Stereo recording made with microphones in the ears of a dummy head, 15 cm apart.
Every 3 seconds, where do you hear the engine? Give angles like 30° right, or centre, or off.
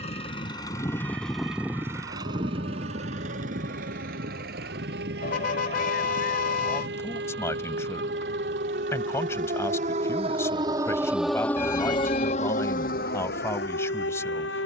centre, 60° right, 70° right, 80° right, 80° right.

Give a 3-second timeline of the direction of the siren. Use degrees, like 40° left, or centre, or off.
80° right, 70° right, 60° right, 20° right, 60° left.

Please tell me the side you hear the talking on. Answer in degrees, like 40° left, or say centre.
20° left.